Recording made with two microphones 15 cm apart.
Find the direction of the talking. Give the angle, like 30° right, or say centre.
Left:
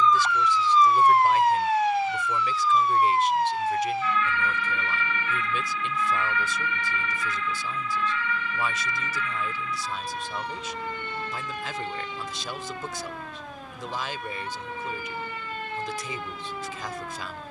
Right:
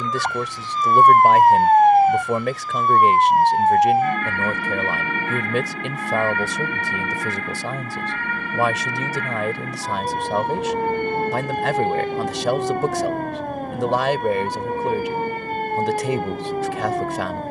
70° right.